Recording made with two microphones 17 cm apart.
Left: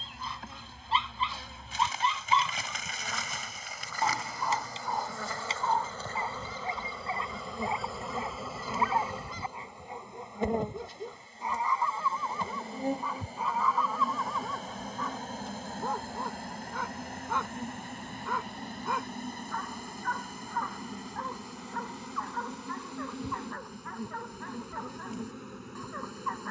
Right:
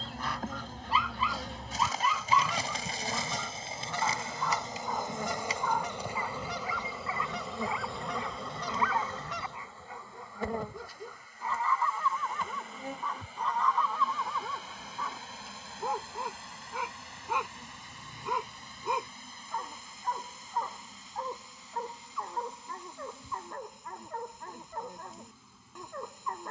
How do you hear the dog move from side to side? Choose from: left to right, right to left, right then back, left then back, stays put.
left to right.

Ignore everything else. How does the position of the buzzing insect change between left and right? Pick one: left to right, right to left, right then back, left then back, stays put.
right to left.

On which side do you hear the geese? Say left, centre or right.
right.